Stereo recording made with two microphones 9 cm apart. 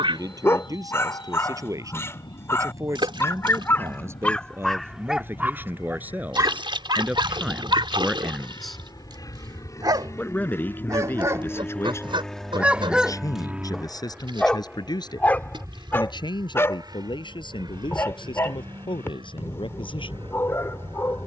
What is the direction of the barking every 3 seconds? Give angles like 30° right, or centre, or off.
30° left, 10° left, 50° right, 40° right, centre, 30° left, 30° left.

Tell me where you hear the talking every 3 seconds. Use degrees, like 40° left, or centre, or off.
40° right, 30° right, 10° right, 20° left, 40° left, 60° left, 70° left.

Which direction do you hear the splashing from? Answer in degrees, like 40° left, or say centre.
70° right.